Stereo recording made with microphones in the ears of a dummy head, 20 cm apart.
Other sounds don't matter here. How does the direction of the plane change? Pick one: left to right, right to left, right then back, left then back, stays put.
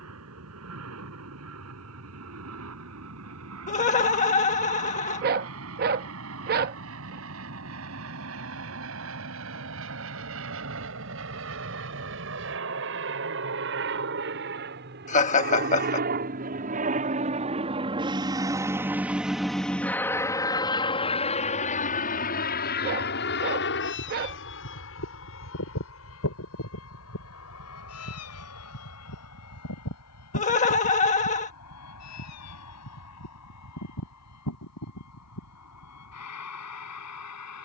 right to left.